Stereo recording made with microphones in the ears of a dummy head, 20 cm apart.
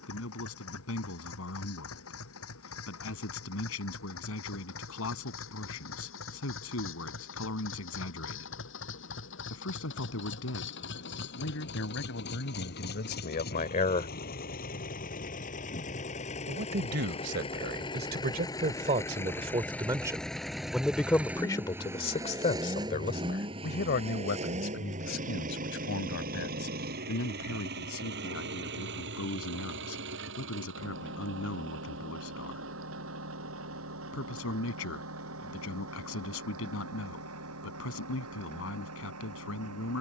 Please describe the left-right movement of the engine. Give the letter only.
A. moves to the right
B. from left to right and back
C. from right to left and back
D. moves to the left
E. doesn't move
A.